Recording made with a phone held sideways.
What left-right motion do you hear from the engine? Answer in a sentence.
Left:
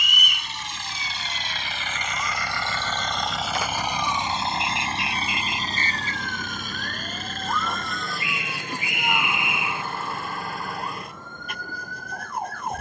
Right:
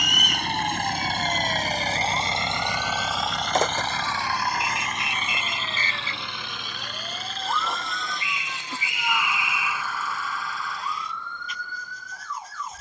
You can hear the engine travel towards the left.